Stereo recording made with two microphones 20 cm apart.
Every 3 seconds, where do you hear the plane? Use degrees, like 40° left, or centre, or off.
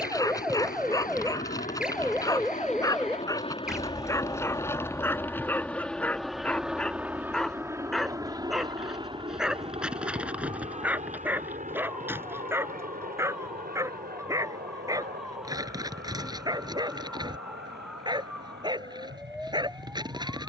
40° left, 20° left, 10° right, 30° right, 40° right, 50° right, 60° right.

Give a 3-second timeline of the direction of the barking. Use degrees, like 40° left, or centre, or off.
20° left, 10° left, centre, 10° right, 10° right, 20° right, 20° right.